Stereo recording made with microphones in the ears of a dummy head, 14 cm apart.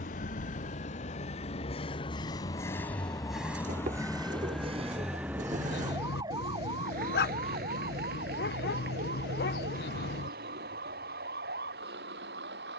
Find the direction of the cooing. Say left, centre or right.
right.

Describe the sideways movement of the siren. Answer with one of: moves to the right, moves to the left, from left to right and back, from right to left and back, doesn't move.
moves to the right.